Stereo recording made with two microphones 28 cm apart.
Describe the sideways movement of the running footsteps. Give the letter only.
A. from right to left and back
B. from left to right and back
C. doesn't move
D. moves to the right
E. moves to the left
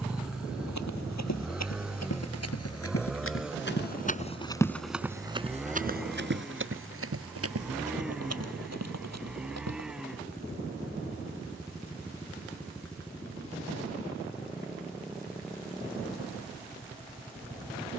D.